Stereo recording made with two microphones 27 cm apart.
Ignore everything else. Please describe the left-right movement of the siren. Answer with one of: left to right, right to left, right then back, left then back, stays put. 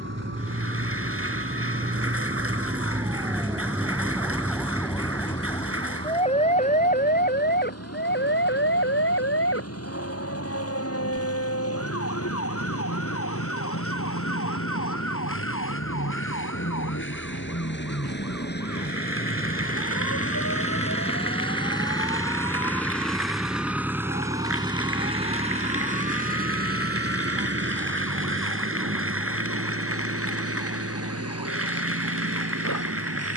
right to left.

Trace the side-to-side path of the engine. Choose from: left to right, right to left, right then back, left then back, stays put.
left to right.